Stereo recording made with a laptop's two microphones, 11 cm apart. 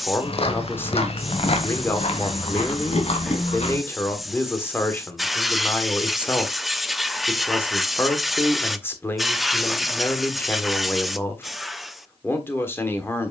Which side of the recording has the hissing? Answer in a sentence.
You can hear the hissing in the centre.